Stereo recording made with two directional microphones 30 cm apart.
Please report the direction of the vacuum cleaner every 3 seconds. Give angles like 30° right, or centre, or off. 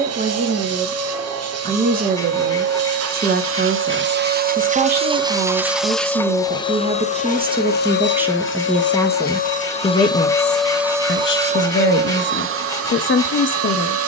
60° right, 30° right, 30° left, centre, 50° right.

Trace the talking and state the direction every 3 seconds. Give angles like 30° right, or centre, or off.
30° right, 30° right, 20° right, 30° left, 40° left.